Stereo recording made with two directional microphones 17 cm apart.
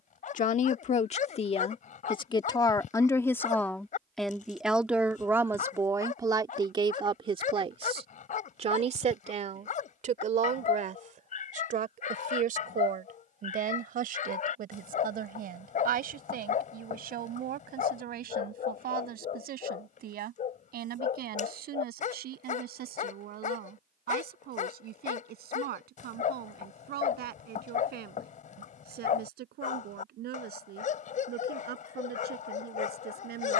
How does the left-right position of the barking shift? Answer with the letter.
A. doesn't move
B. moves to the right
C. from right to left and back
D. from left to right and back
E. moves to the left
A.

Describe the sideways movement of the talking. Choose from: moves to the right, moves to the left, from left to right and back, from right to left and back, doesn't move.
moves to the right.